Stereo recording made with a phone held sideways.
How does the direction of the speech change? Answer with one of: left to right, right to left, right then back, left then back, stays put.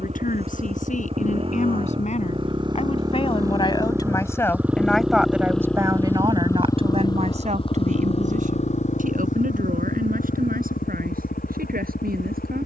left to right.